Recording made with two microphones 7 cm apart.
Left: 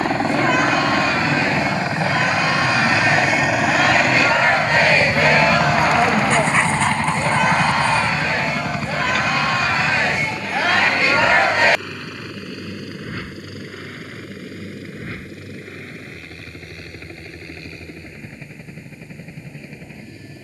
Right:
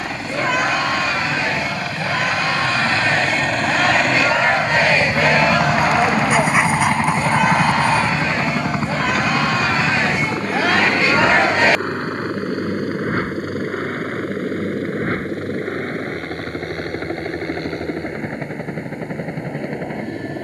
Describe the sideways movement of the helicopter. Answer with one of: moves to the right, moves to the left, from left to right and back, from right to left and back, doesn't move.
moves to the right.